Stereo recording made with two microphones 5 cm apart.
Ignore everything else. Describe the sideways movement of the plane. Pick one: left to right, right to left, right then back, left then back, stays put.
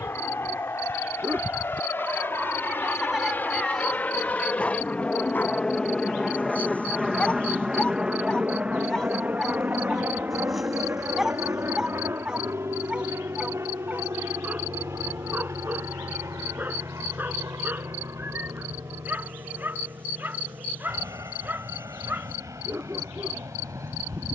left to right.